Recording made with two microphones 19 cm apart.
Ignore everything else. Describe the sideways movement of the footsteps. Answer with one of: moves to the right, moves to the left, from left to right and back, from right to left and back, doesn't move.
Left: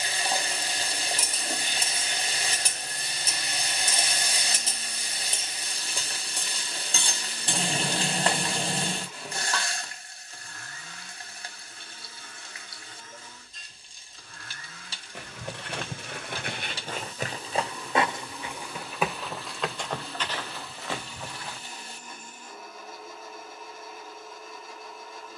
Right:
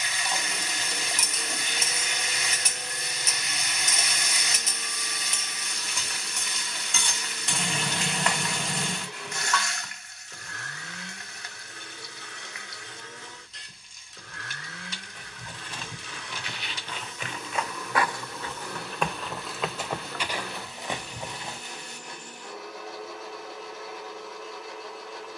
moves to the right.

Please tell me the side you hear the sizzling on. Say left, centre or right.
left.